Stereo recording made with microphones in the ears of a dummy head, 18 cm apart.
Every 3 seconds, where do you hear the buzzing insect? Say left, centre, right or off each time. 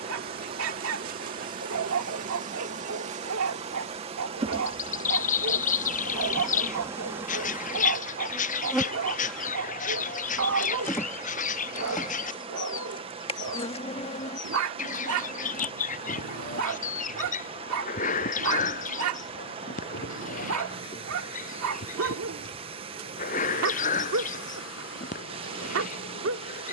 right, right, centre, centre, left, left, left, left, left.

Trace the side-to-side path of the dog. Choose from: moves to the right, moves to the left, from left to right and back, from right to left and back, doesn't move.
doesn't move.